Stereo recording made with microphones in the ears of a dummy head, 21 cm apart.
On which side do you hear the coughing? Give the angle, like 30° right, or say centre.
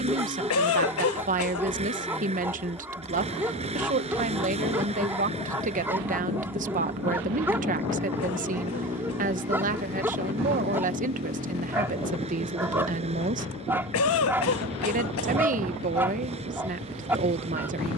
70° left.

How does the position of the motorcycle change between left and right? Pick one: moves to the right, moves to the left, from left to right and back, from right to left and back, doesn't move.
doesn't move.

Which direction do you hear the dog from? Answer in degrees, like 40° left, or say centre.
10° right.